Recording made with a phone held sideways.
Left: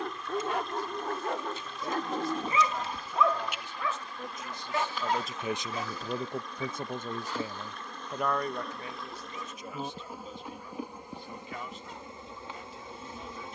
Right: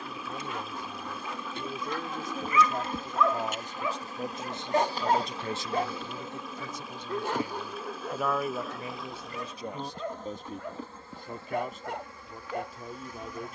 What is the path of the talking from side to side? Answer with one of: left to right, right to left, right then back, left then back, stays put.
left then back.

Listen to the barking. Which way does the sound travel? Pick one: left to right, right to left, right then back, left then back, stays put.
left to right.